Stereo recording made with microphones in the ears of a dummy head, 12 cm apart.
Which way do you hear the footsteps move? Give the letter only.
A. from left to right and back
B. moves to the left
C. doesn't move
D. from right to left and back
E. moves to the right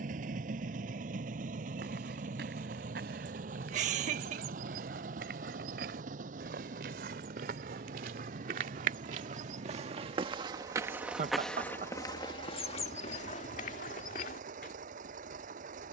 B.